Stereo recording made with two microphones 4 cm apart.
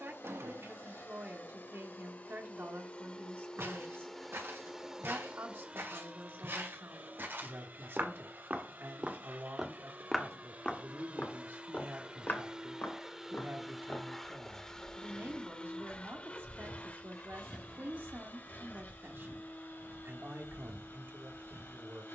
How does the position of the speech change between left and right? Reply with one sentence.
You can hear the speech stay in one place.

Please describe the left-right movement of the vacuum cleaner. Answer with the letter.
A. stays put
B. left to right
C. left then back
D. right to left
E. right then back
E.